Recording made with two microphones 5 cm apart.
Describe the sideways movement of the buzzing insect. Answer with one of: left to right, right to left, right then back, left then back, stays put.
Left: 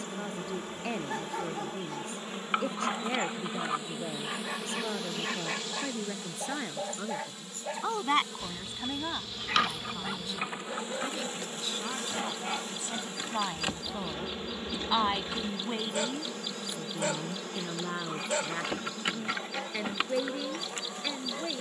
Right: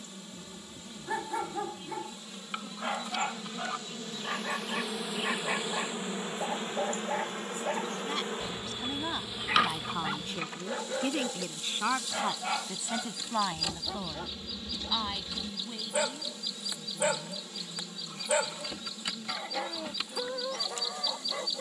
right then back.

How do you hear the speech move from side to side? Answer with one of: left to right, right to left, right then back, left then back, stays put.
right then back.